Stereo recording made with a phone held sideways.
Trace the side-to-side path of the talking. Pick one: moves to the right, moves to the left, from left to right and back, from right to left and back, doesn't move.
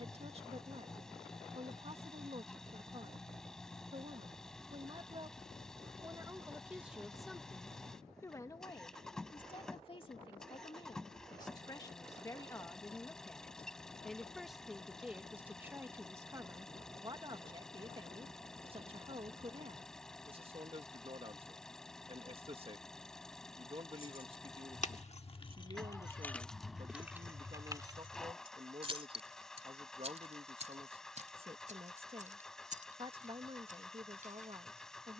from right to left and back.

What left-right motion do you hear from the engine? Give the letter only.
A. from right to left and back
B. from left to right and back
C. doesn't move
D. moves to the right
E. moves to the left
C.